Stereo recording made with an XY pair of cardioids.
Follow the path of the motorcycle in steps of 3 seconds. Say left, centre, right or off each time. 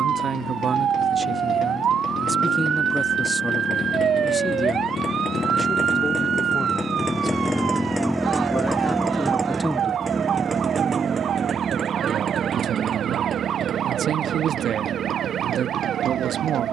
left, left, centre, right, right, right.